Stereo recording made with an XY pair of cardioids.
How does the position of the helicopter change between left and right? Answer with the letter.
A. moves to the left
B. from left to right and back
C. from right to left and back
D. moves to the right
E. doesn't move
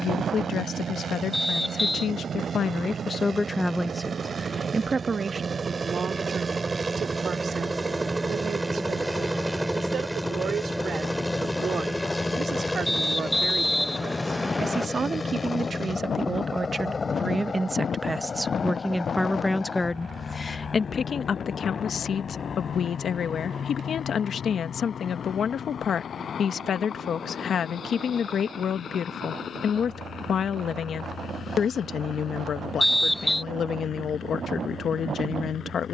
A.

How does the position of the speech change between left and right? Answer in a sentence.
In this clip you hear the speech move from left to right and back again.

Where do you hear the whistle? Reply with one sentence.
You can hear the whistle in the centre.